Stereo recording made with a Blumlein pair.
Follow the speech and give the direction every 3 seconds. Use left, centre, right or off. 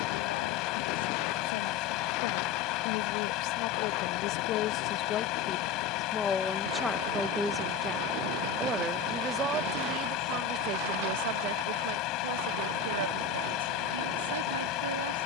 left, left, centre, right, right.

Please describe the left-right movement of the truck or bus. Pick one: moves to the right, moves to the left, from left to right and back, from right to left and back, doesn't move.
doesn't move.